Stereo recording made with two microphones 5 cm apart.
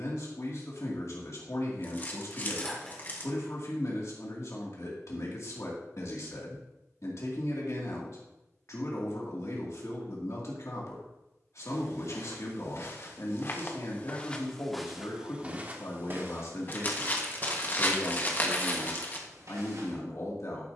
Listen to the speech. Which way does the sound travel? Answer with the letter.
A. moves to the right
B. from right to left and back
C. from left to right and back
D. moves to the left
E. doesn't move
E.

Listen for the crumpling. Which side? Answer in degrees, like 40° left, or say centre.
30° left.